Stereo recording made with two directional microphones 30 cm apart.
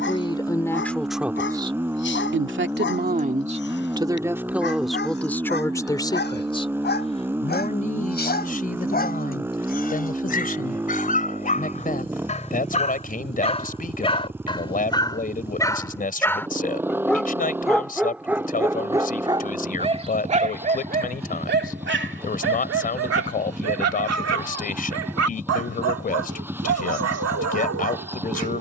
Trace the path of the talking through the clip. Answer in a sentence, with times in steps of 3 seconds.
In this clip you hear the talking in the centre from 0 s and on the left from 6 s.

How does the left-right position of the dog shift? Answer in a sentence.
In this clip you hear the dog move from left to right.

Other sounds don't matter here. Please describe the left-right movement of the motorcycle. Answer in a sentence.
In this clip you hear the motorcycle stay in one place.